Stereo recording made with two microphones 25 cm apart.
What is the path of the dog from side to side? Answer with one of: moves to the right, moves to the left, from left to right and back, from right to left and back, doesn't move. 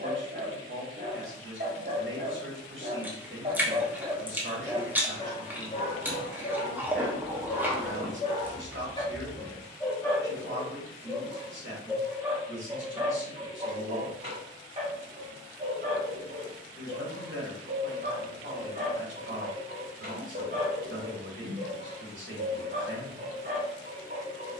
from right to left and back.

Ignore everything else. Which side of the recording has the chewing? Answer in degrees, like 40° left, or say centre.
10° right.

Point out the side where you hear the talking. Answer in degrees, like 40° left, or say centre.
50° right.